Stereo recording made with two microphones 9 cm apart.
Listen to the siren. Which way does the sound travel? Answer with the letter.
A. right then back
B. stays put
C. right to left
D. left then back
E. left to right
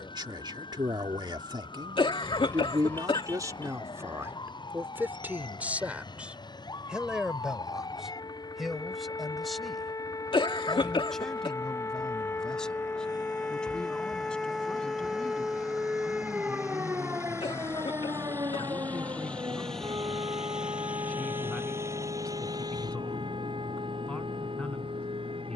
E.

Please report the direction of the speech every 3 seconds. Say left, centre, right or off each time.
right, right, centre, centre, centre, centre, centre, centre, centre.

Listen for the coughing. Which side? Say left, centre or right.
left.